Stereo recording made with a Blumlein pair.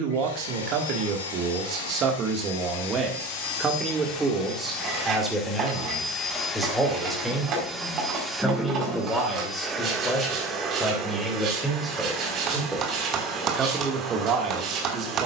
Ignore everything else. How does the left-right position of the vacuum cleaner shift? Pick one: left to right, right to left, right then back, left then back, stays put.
left to right.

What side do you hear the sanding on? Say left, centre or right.
right.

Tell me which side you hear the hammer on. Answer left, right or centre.
right.